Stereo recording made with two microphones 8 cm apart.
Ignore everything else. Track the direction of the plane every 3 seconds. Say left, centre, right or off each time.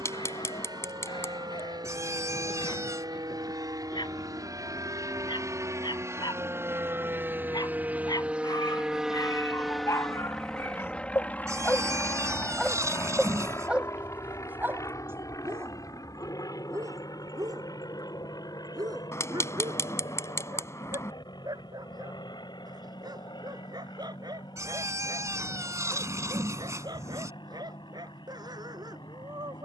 right, right, right, centre, left, left, left, left, left, left.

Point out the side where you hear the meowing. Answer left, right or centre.
right.